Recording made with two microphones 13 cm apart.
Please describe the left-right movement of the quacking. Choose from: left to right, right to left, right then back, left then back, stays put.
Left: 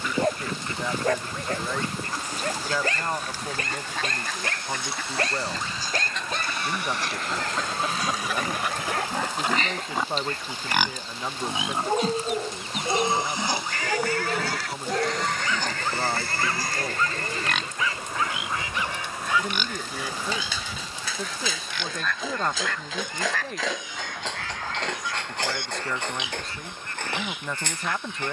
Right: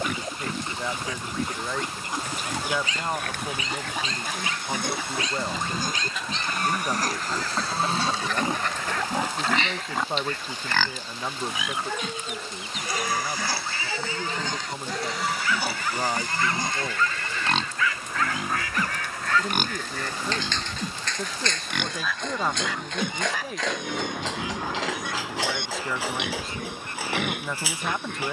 left then back.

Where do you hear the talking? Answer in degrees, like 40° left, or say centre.
centre.